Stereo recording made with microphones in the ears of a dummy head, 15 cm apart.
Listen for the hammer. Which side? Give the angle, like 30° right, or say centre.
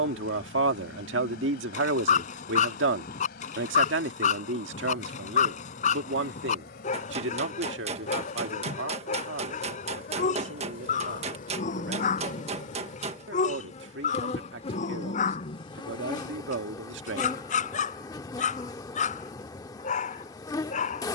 40° right.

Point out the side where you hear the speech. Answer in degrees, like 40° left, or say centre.
80° right.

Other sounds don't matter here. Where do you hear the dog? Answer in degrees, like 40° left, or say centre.
50° left.